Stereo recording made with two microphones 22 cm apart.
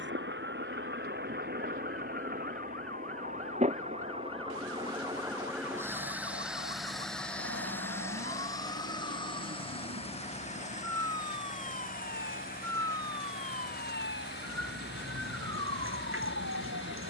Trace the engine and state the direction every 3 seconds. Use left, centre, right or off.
right, right, centre, left, left, left.